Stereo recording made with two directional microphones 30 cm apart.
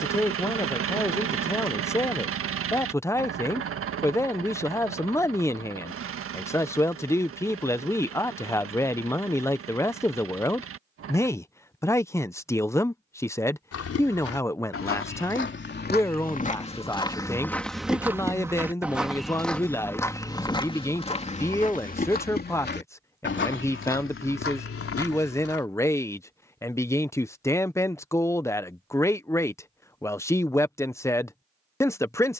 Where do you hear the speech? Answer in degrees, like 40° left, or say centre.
10° left.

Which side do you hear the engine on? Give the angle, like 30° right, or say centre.
50° right.